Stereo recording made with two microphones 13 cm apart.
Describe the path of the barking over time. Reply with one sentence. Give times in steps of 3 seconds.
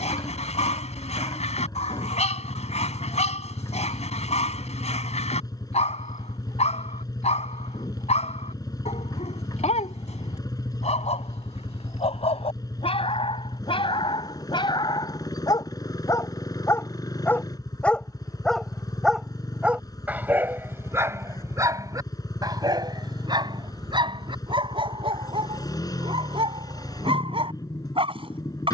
You can hear the barking on the left from 0 s, in the centre from 18 s and on the right from 21 s.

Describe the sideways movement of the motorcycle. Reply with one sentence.
You can hear the motorcycle stay in one place.